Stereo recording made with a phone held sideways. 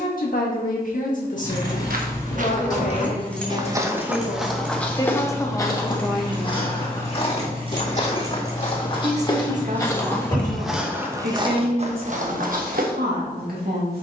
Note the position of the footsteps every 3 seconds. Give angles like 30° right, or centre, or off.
60° right, centre, 40° left, centre, 60° right.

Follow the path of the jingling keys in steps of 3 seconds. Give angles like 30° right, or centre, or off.
20° left, 10° right, 30° right, 10° left, off.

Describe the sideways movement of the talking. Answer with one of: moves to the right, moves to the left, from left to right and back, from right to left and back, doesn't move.
moves to the right.